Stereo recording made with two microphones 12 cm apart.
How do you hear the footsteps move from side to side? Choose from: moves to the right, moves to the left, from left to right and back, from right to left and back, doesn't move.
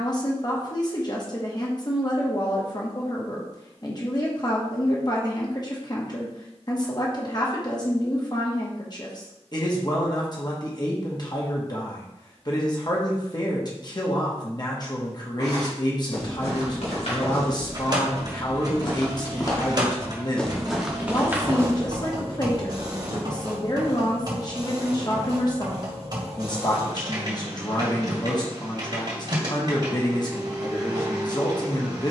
moves to the right.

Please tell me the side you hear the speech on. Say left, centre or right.
left.